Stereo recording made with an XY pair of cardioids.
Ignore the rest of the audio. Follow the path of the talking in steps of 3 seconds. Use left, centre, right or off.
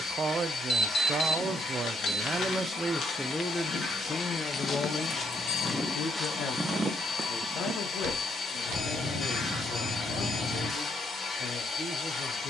right, left, left, left.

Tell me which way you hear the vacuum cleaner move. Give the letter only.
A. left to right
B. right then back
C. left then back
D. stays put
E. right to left
D.